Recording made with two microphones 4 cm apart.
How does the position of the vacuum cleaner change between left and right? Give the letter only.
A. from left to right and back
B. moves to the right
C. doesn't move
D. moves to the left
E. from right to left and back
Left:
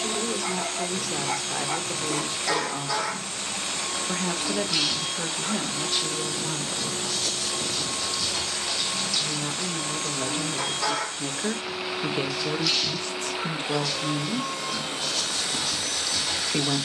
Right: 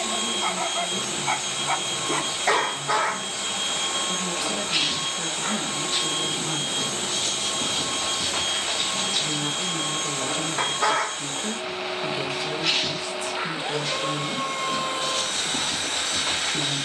C.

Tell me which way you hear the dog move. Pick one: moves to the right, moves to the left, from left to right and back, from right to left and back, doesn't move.
doesn't move.